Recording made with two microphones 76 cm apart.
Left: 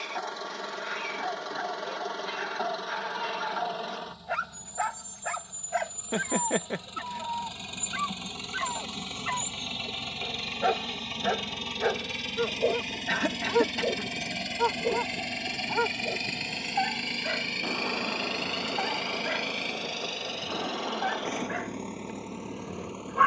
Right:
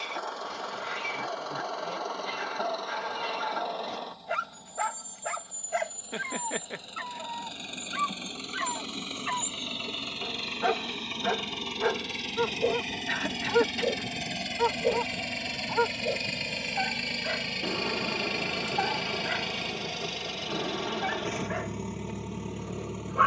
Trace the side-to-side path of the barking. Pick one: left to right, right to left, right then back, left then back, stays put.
right to left.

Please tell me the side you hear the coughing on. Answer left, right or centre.
left.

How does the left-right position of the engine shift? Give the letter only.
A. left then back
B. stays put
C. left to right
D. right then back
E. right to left
C.